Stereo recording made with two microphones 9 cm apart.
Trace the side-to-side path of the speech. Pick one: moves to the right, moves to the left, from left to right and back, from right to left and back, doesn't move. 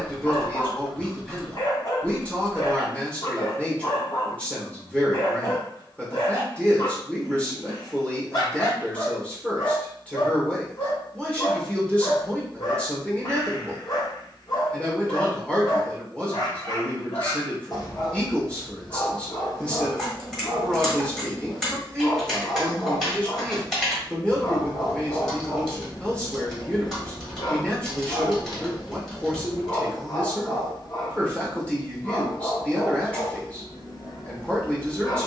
doesn't move.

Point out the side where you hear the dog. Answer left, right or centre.
left.